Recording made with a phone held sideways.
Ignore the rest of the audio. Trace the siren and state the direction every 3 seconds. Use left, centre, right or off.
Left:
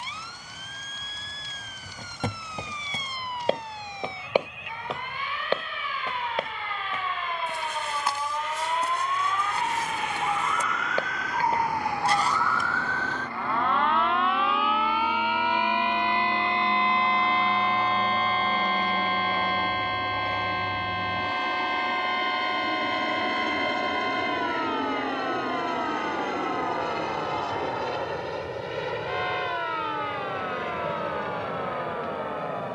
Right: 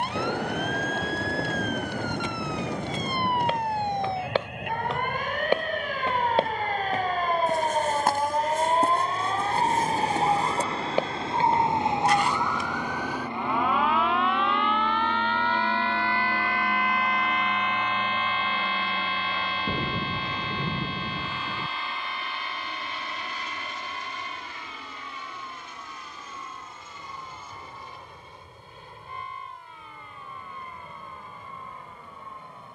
right, right, right, right, centre, left, left, left, left, left, left.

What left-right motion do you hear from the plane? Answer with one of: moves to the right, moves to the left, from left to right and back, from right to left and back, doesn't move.
moves to the left.